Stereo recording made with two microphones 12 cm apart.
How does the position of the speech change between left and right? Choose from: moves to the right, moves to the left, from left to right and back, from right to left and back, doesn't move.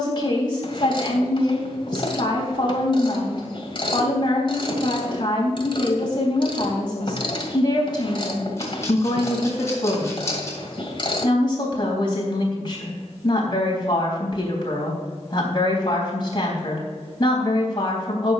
doesn't move.